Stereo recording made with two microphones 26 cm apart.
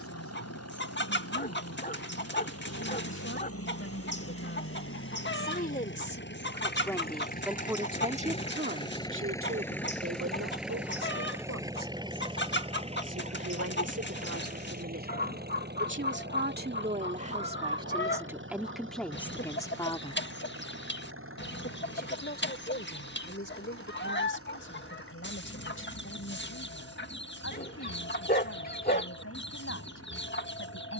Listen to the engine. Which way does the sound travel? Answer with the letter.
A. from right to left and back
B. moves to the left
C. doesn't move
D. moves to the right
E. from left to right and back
D.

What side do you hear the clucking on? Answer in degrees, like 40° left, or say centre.
40° left.